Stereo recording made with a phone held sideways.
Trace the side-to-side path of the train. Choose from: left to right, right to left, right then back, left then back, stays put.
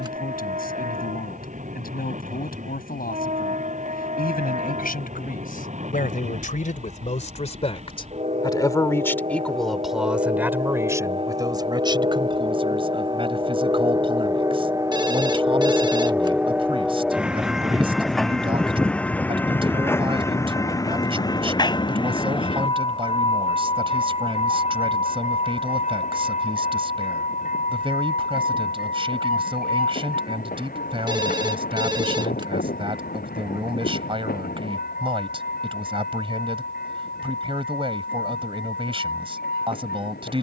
right to left.